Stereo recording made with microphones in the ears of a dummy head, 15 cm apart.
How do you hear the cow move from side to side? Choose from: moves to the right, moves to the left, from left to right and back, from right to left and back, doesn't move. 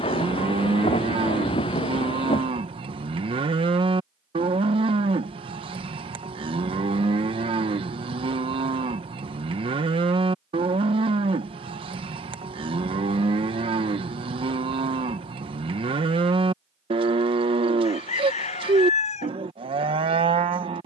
doesn't move.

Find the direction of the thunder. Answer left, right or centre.
left.